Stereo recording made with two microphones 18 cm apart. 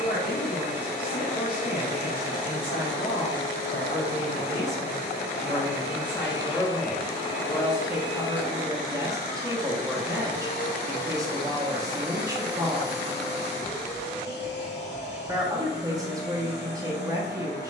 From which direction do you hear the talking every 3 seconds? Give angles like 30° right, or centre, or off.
60° left, 40° left, centre, 20° right, 20° right, 20° right.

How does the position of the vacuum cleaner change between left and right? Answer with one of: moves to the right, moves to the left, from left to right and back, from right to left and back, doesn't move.
doesn't move.